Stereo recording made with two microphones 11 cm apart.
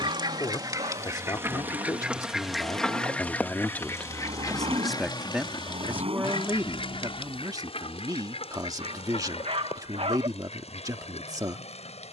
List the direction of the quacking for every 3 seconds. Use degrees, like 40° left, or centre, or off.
20° right, 30° left, 60° left, 70° left.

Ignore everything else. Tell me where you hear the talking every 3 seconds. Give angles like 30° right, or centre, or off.
30° left, 10° left, 30° right, 30° right.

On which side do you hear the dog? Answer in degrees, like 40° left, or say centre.
60° right.